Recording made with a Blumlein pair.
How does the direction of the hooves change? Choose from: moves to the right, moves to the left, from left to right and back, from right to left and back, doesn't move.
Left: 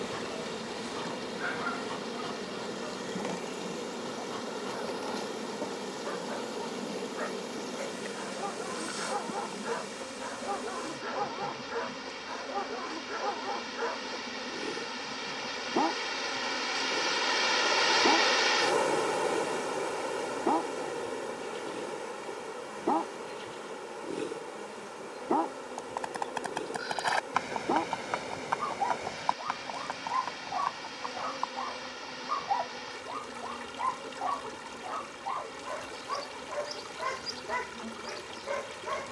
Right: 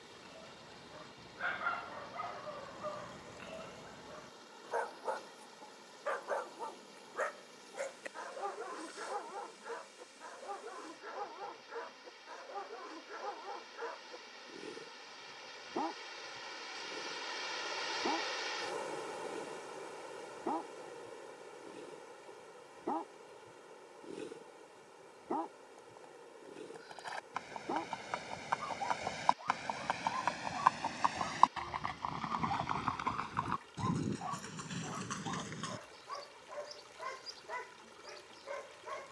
moves to the right.